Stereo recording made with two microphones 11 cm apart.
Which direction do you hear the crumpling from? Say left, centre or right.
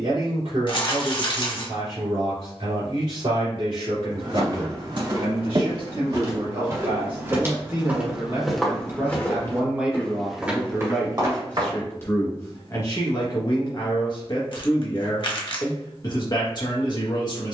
left.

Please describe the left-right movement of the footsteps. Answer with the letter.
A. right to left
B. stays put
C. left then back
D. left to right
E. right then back
C.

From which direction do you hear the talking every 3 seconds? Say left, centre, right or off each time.
right, right, right, centre, left, left.